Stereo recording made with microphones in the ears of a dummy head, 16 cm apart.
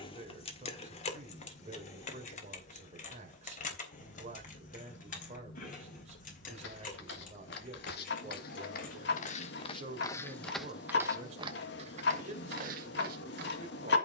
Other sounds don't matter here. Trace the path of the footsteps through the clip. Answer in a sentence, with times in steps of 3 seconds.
In this clip you hear the footsteps not at all from 0 s, on the left from 6 s, in the centre from 9 s and on the right from 12 s.